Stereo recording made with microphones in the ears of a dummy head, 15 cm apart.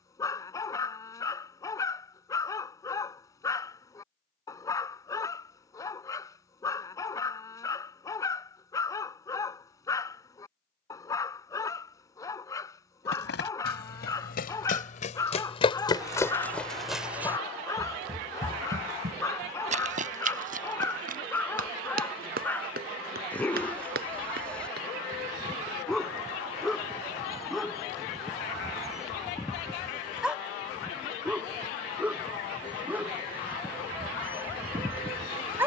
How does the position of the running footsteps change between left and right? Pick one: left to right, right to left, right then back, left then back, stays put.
left to right.